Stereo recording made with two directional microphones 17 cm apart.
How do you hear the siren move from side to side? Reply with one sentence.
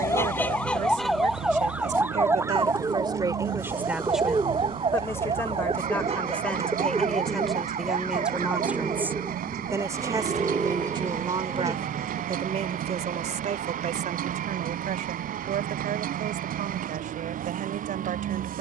You can hear the siren go from the left side to the right.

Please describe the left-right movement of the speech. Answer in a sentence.
You can hear the speech move from right to left and back again.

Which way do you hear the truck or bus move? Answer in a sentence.
In this clip you hear the truck or bus stay in one place.